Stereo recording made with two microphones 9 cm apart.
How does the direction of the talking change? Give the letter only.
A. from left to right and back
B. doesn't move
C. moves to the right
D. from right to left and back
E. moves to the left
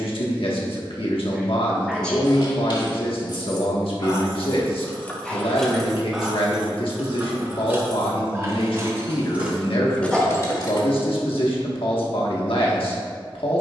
B.